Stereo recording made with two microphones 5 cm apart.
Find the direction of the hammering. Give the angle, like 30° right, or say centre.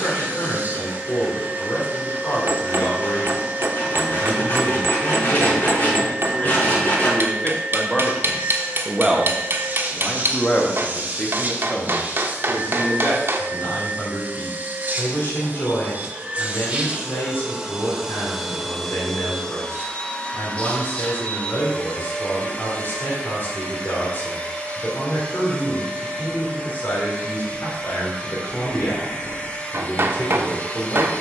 50° right.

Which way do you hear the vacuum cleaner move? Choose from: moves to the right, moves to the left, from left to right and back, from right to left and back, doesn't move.
moves to the left.